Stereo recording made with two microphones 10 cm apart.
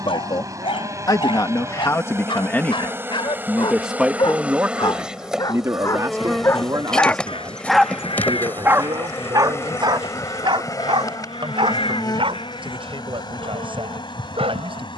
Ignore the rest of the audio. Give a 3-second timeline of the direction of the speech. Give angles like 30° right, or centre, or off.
40° left, 20° right, 40° right, 50° right, 60° right.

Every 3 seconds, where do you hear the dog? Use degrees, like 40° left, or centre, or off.
60° left, 50° left, centre, 60° right, 80° right.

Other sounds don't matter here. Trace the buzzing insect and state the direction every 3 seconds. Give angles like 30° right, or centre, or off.
30° right, 10° right, 10° left, 40° left, 50° left.